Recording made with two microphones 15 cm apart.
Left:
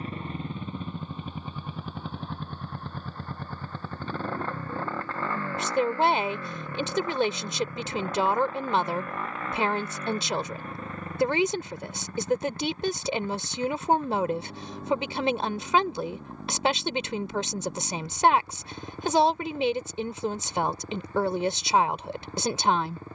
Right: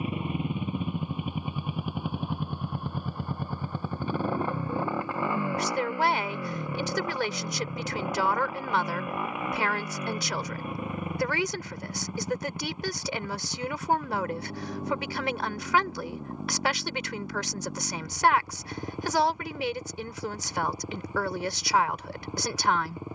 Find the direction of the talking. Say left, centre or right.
left.